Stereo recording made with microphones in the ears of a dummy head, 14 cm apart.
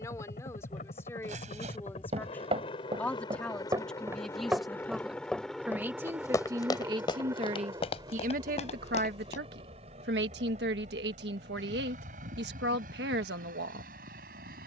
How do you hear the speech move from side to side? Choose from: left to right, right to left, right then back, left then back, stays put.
left to right.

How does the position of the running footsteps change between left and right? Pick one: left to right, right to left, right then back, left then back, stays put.
right to left.